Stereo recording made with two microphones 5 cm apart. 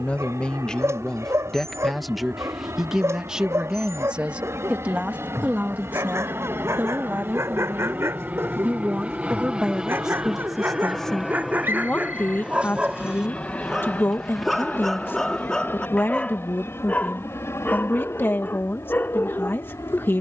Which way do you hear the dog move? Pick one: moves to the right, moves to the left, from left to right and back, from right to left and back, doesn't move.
moves to the left.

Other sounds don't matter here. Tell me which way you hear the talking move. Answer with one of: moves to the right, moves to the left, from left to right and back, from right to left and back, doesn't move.
from left to right and back.